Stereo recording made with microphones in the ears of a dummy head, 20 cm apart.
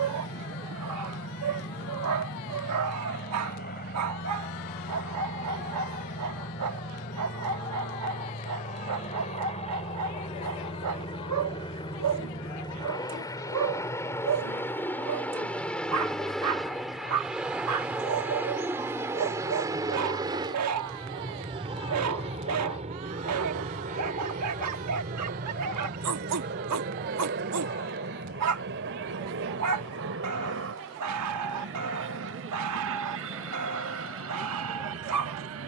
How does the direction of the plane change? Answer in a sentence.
You can hear the plane move from left to right.